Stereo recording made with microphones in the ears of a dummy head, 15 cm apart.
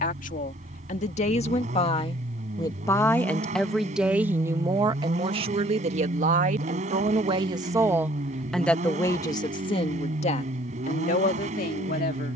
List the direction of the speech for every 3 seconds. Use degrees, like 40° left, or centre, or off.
40° left, 20° right, 30° right, 40° left.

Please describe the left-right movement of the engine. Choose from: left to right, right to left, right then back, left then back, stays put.
stays put.